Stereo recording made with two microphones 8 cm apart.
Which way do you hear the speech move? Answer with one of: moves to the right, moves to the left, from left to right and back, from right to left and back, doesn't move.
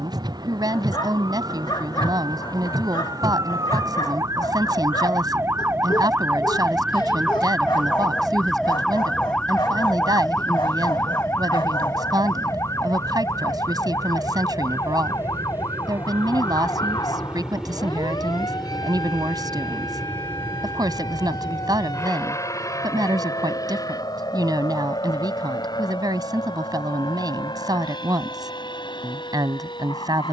doesn't move.